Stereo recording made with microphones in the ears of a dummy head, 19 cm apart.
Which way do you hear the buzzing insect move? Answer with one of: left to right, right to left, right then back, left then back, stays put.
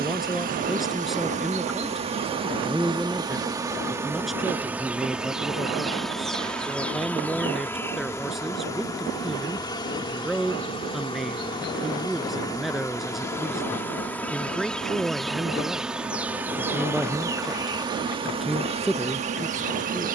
left then back.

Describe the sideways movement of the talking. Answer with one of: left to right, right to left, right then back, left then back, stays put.
stays put.